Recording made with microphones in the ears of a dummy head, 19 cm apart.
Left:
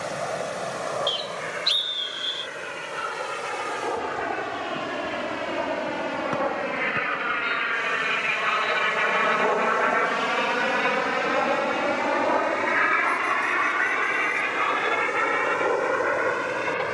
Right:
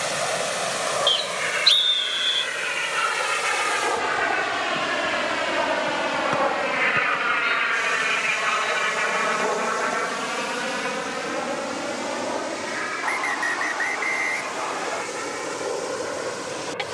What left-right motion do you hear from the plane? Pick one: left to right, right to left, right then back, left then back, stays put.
right to left.